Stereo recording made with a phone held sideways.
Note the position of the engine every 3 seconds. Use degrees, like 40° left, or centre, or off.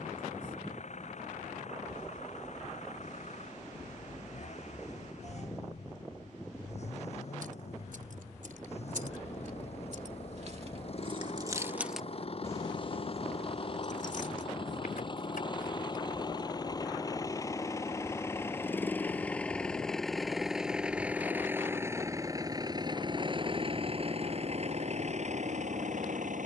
60° left, 60° left, 50° left, 50° left, 40° left, 30° left, 10° left, 30° right, 50° right.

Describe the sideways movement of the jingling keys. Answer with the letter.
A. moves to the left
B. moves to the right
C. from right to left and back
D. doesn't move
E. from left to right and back
A.